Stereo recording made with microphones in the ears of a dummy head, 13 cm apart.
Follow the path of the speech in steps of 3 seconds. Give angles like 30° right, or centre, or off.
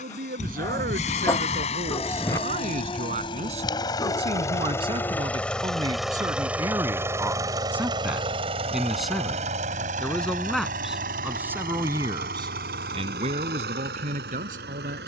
60° right, 40° right, 20° right, centre, 50° right.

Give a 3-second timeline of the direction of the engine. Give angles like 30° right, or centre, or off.
40° left, 20° left, 20° right, 60° right, 70° right.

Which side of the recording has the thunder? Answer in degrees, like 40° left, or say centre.
20° left.